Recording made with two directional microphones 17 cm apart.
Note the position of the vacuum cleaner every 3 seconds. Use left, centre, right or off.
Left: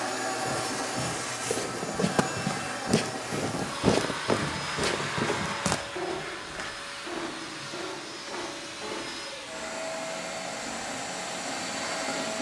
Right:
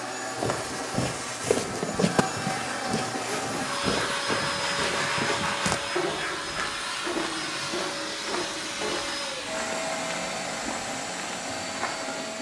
centre, right, right, right.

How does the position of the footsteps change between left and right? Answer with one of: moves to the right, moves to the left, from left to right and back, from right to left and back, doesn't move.
from right to left and back.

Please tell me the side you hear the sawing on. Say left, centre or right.
right.